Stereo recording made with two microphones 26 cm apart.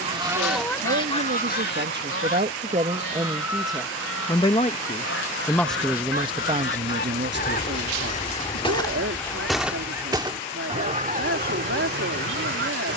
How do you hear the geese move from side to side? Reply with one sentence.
You can hear the geese go left and come back.